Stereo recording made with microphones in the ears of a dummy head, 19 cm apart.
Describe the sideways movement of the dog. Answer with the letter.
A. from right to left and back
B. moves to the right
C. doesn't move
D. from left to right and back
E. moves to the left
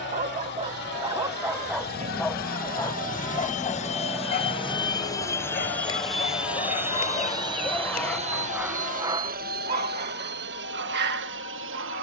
A.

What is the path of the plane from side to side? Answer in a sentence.
You can hear the plane travel towards the right.